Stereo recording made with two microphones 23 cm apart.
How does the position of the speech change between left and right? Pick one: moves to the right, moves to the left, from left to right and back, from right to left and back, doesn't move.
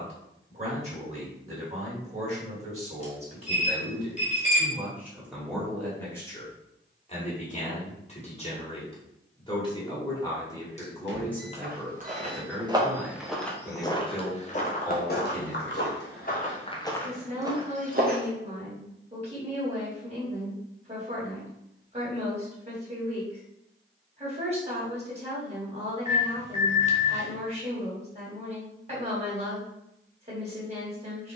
from right to left and back.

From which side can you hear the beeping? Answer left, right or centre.
left.